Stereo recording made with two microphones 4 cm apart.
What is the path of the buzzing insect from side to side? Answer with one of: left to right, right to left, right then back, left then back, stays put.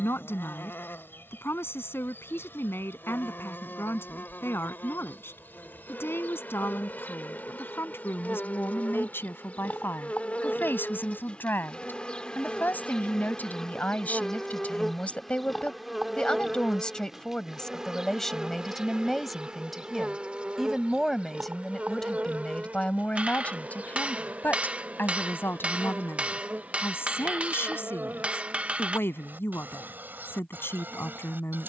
left to right.